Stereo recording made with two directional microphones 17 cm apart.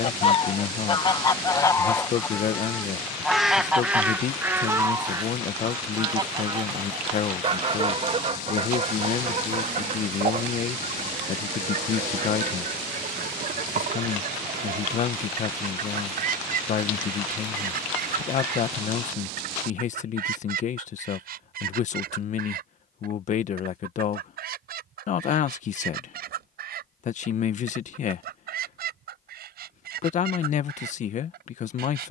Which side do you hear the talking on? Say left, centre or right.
left.